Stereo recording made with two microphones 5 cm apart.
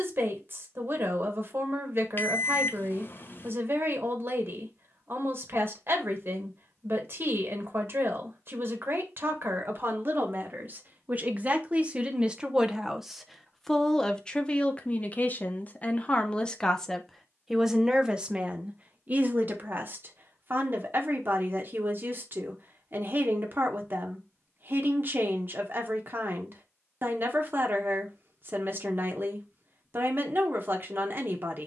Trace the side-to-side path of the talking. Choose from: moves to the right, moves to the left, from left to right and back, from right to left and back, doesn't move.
from right to left and back.